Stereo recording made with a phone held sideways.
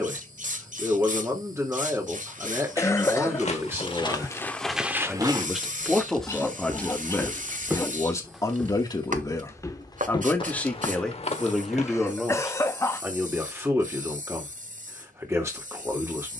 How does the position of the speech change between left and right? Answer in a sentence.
You can hear the speech move from right to left and back again.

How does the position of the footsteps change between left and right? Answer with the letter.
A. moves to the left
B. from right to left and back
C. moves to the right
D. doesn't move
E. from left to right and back
E.